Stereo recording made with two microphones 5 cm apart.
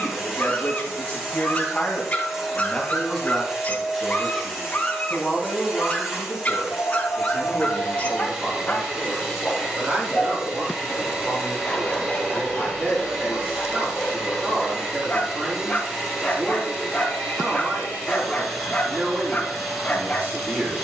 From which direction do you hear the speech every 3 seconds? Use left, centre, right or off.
left, centre, right, right, right, right, right.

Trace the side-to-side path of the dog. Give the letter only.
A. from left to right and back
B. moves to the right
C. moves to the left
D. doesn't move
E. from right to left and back
D.